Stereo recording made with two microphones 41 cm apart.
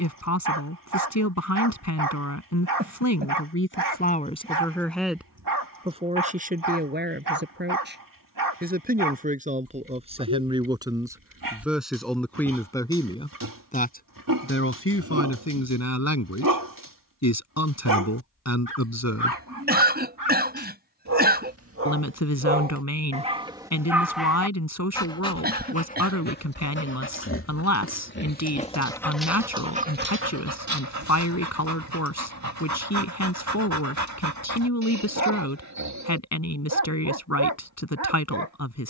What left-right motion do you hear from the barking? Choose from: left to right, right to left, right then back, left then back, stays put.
left then back.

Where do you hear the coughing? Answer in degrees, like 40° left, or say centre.
20° right.